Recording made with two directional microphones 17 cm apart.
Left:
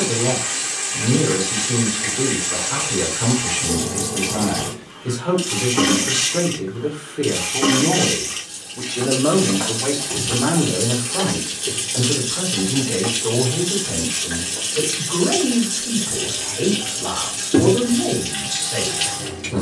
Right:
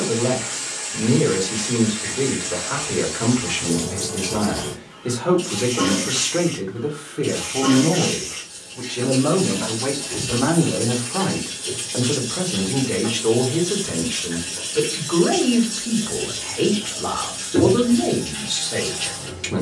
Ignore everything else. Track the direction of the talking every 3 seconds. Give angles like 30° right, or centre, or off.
40° right, 30° right, centre, centre, 30° right, 30° right, 30° right.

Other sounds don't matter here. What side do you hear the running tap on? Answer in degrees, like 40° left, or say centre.
50° left.